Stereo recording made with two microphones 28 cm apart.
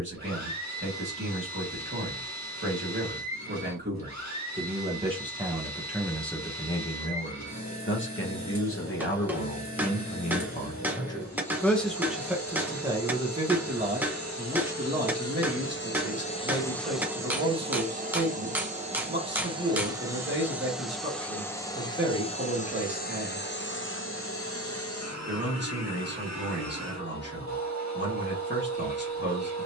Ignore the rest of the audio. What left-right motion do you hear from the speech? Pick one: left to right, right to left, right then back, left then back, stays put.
left then back.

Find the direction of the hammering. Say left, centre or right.
centre.